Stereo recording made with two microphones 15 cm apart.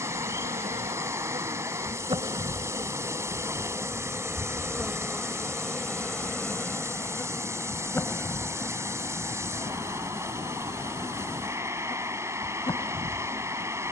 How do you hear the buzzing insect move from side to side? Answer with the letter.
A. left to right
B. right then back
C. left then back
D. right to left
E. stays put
D.